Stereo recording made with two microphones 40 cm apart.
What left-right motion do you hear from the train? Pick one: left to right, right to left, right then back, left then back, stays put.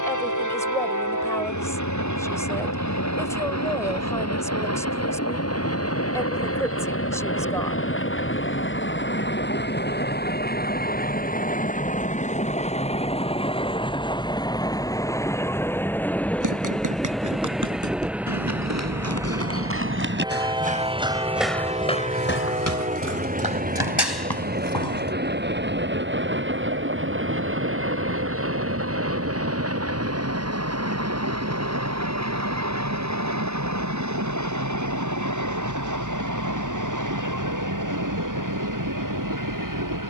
left to right.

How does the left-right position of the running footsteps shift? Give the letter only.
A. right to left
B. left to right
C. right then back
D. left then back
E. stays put
A.